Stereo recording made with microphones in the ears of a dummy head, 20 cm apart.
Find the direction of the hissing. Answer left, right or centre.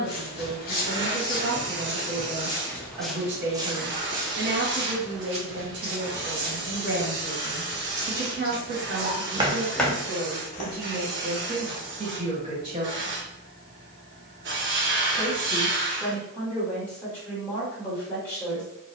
right.